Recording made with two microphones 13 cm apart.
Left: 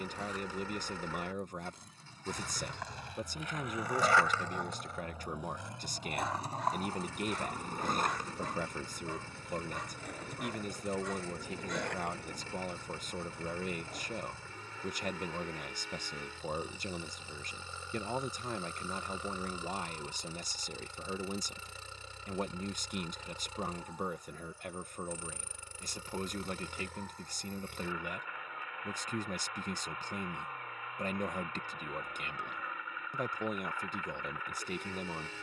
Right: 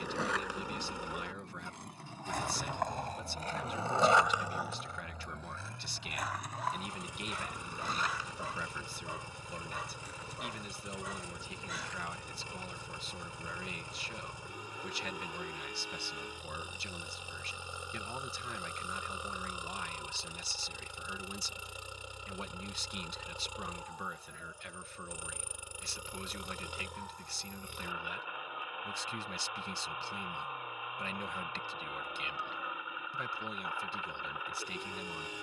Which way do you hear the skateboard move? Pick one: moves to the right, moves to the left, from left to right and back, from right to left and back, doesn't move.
moves to the left.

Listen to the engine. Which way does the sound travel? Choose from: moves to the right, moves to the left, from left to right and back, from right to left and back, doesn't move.
doesn't move.